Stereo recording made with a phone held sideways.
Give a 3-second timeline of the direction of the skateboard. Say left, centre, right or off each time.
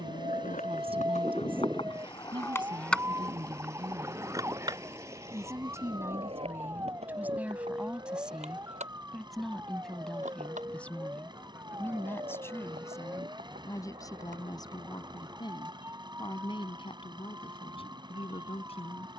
left, right, right, right, right, off, off.